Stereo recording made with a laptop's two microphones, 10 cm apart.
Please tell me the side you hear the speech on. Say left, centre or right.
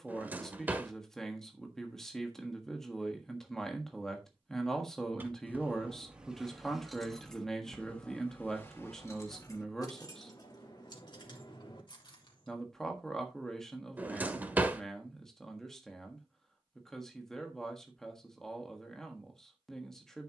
centre.